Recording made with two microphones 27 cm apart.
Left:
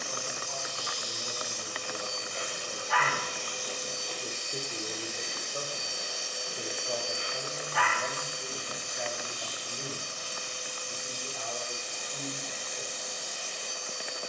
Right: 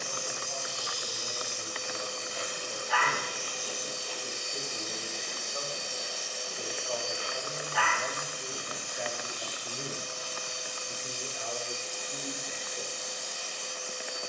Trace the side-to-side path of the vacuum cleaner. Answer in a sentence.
You can hear the vacuum cleaner move to the left.